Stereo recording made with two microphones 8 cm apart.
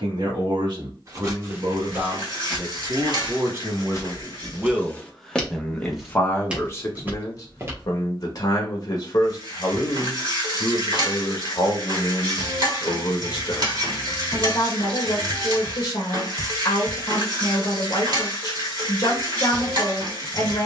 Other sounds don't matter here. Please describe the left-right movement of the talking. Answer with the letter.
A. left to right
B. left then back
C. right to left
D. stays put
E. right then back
C.